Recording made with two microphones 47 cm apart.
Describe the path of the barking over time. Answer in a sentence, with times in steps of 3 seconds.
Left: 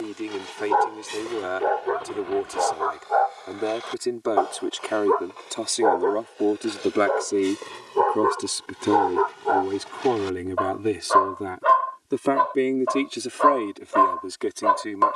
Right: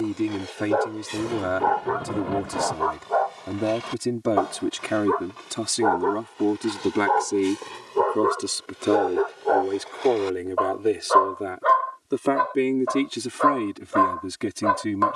In this clip you hear the barking in the centre from 0 s, on the right from 3 s, in the centre from 6 s and on the left from 9 s.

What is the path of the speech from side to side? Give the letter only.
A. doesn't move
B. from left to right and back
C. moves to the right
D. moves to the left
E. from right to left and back
E.